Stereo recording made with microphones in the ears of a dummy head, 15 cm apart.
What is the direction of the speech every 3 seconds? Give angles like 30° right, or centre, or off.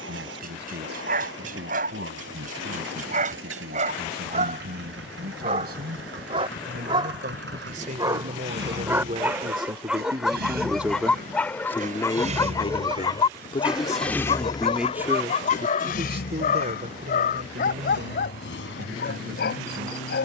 70° right, 60° right, 50° right, 20° right, 20° left, 40° right, 60° right.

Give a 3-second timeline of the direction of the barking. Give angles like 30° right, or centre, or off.
50° right, 40° right, 20° right, centre, 30° left, 50° left, 60° left.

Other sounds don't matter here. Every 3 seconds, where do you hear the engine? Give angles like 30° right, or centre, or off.
80° right, 80° right, 70° right, 60° right, 10° right, 60° left, 80° left.